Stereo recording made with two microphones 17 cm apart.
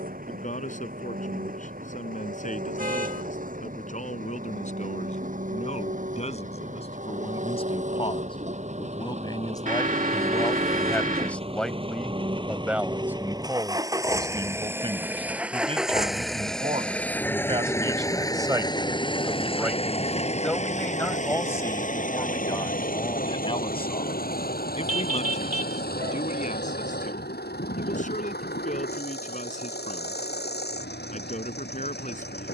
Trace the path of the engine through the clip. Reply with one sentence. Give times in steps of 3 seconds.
In this clip you hear the engine on the right from 0 s, in the centre from 15 s and on the left from 18 s.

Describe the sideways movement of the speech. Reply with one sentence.
You can hear the speech move from left to right and back again.